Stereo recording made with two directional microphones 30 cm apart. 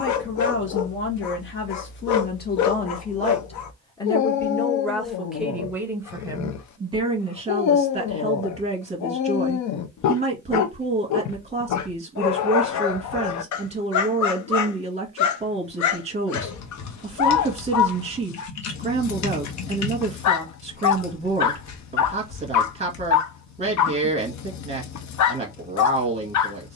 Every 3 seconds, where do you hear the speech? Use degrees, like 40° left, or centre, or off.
40° left, 10° left, 20° right, 20° right, 20° right, 20° right, 20° right, 20° right, 20° right.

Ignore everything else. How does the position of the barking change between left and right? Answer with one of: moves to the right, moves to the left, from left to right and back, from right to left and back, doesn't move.
doesn't move.